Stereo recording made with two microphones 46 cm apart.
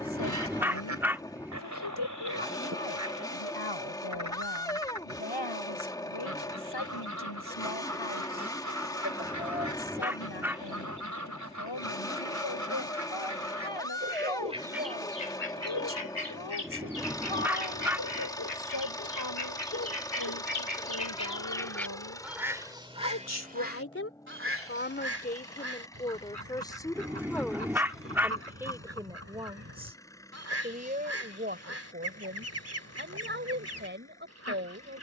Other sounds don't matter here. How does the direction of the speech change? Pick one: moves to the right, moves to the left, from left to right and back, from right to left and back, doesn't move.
moves to the right.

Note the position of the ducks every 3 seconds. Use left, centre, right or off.
right, right, right, right, right, left, left, centre, right, right, right, right.